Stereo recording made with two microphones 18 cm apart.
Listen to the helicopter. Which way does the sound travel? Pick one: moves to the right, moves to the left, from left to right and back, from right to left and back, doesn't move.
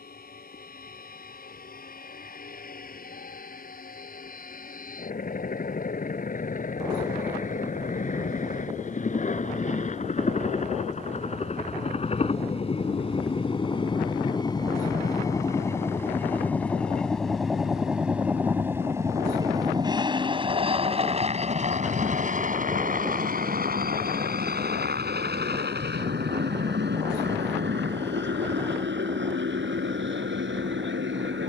moves to the right.